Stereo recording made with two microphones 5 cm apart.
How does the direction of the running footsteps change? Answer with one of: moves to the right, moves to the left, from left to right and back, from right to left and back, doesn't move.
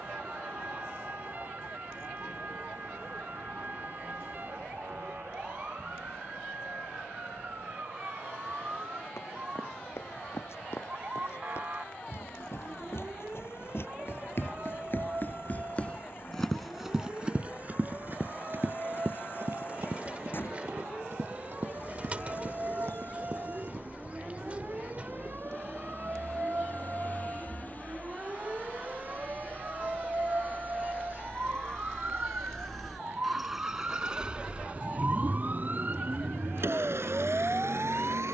moves to the right.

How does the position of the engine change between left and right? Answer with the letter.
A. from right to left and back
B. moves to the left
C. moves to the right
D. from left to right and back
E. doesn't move
C.